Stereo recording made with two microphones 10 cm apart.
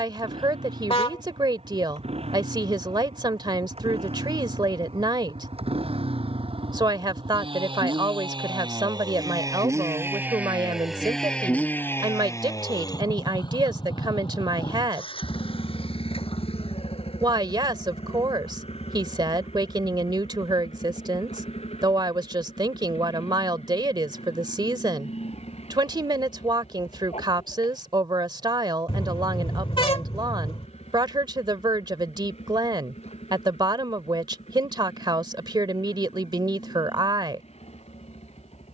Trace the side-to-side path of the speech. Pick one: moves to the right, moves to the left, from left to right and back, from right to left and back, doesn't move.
doesn't move.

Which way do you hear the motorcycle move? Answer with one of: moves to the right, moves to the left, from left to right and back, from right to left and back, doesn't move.
moves to the left.